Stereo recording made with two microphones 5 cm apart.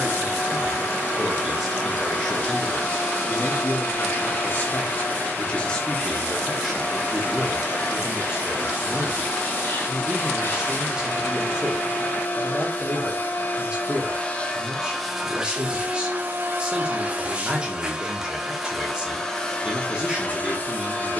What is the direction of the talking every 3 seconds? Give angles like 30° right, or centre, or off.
centre, 30° left, 10° right, 20° right, 20° right, 20° right, 20° right.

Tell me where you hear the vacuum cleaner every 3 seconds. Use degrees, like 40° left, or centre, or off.
40° left, 40° left, 40° left, 40° left, 30° left, 20° right, 10° left.